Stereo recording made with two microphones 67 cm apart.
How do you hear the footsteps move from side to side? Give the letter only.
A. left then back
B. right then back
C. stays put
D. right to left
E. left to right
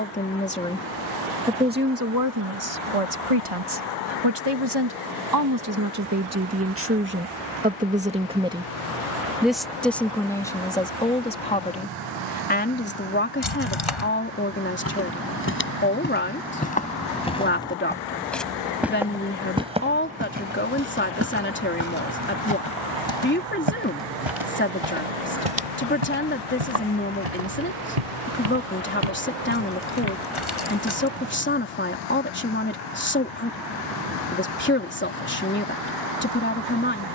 E.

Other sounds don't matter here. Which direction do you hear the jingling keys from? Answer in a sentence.
You can hear the jingling keys on the left.